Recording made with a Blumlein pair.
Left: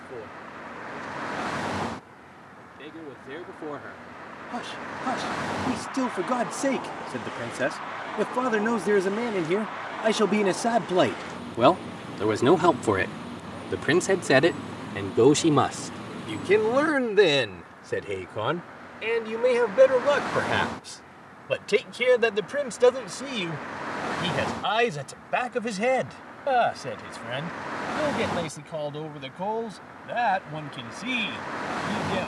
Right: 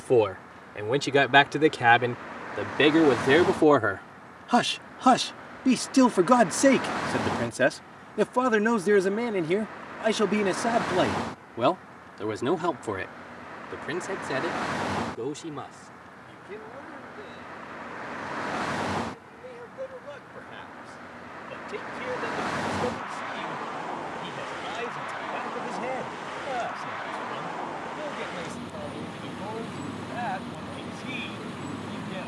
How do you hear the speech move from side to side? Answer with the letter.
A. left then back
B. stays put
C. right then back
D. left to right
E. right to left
E.